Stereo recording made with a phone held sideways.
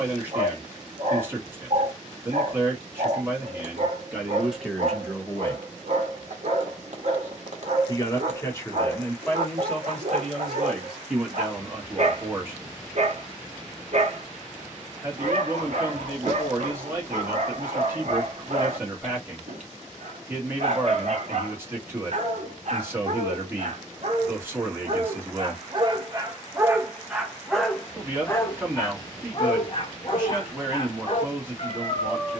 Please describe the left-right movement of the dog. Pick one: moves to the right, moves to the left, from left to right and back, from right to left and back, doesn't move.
moves to the left.